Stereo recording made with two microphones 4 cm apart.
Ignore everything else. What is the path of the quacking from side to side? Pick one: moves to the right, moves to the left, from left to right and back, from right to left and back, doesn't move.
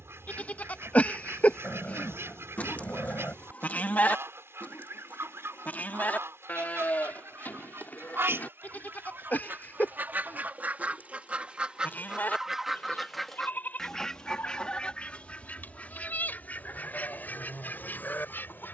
moves to the left.